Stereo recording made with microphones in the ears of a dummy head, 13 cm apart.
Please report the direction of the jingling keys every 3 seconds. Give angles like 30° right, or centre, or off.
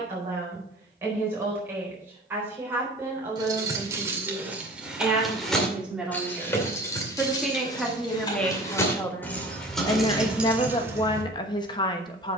off, 10° right, 20° left, 10° right.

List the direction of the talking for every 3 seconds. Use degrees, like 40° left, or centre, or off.
20° right, 10° right, centre, 30° left.